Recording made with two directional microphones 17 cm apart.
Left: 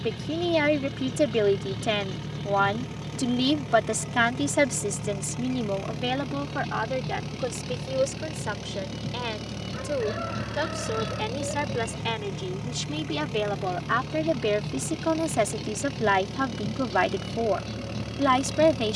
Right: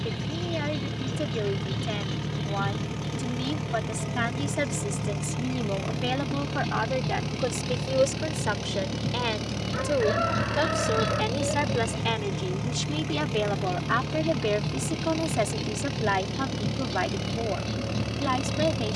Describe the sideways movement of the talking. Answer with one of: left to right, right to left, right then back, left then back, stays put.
right then back.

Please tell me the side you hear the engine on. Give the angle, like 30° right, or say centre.
20° right.